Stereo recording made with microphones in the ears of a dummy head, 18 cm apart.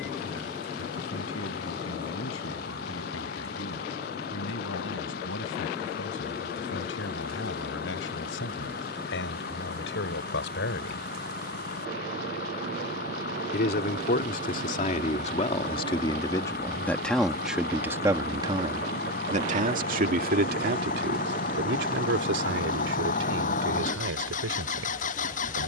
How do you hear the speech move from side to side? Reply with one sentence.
In this clip you hear the speech move to the right.